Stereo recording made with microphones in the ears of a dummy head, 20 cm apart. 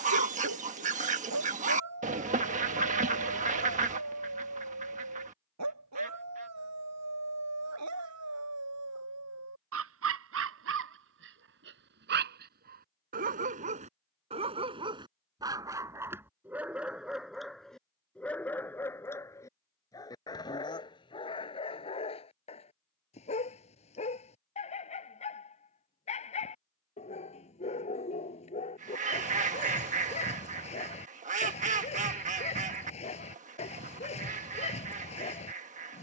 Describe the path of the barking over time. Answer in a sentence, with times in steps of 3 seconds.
You can hear the barking on the right from 0 s, in the centre from 15 s and on the left from 21 s.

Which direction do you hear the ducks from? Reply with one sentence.
In this clip you hear the ducks on the right.